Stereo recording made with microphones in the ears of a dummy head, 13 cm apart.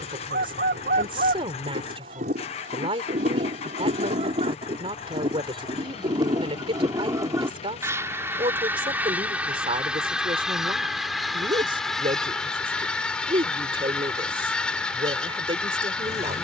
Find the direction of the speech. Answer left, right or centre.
right.